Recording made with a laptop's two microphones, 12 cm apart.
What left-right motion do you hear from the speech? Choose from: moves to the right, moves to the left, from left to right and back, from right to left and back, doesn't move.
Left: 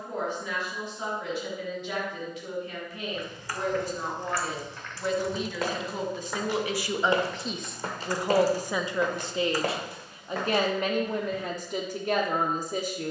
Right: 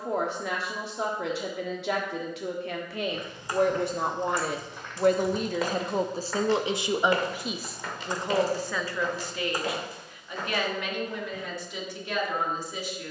moves to the left.